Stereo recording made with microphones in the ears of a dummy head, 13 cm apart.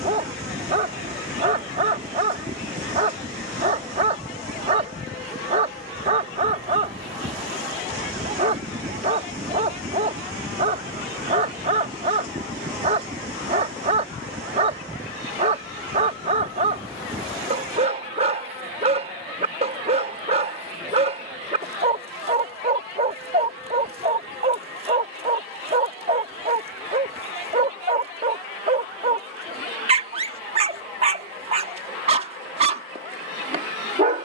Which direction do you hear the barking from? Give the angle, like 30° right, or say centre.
40° right.